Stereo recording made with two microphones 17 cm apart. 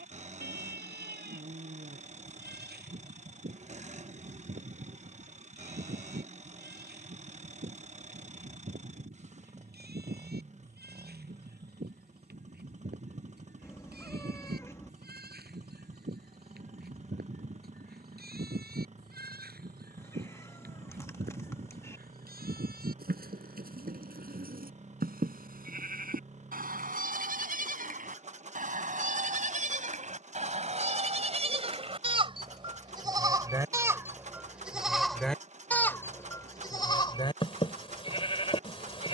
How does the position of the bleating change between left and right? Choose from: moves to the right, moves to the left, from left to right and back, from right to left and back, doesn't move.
moves to the left.